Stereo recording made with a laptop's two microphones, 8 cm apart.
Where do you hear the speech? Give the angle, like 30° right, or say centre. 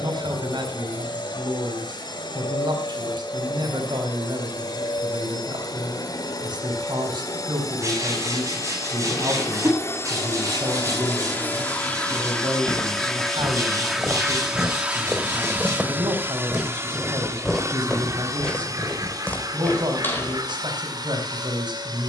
70° right.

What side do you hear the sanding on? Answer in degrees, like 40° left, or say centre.
40° right.